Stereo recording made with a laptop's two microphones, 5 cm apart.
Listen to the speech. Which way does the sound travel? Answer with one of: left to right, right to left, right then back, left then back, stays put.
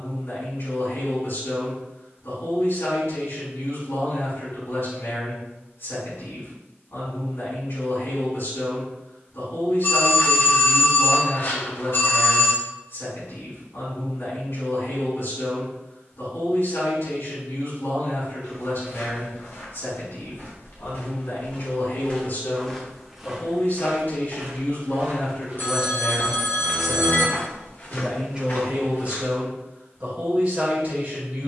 left to right.